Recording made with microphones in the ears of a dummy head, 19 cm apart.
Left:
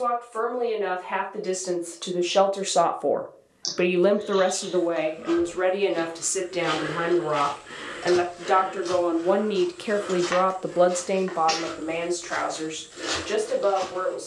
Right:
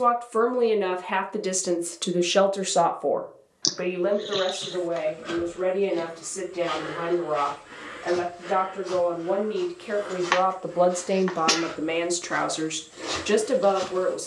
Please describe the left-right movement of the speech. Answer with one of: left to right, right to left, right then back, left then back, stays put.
left then back.